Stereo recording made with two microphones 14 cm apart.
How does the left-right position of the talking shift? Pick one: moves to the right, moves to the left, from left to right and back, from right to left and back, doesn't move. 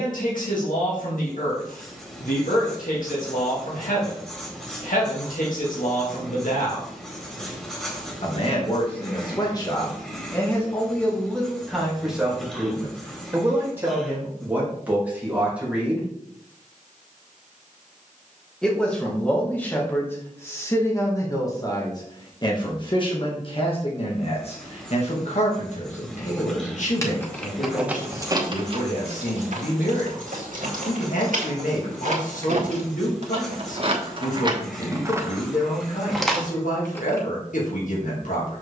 from left to right and back.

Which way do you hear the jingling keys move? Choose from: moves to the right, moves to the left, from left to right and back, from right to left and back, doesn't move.
from left to right and back.